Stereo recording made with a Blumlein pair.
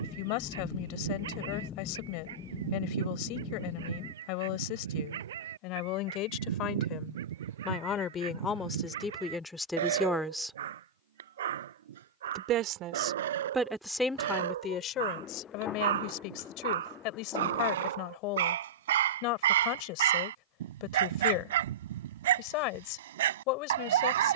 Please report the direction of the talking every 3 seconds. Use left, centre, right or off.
left, left, left, centre, centre, left, left, left.